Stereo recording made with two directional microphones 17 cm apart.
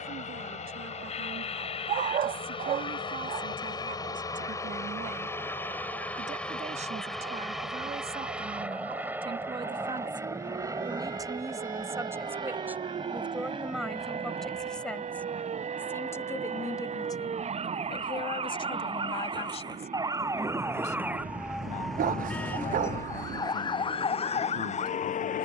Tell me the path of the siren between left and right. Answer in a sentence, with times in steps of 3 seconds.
In this clip you hear the siren on the right from 0 s, in the centre from 21 s and on the left from 24 s.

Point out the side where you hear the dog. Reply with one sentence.
You can hear the dog on the right.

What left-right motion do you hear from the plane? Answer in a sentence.
You can hear the plane travel towards the right.